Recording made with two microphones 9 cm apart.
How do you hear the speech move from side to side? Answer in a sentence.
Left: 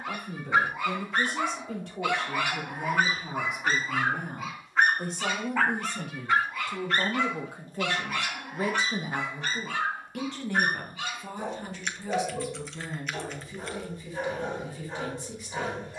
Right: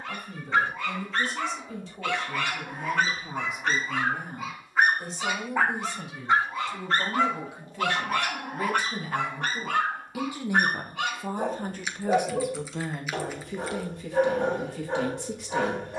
You can hear the speech travel towards the right.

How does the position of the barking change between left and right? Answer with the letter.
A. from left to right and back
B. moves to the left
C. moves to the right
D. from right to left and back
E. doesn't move
C.